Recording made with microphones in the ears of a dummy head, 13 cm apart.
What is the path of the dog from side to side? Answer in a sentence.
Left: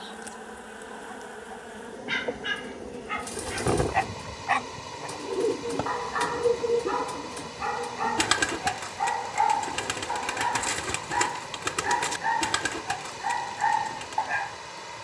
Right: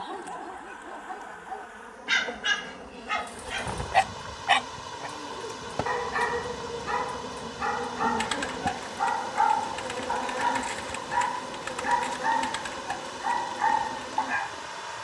In this clip you hear the dog travel towards the left.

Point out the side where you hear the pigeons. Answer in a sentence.
You can hear the pigeons on the left.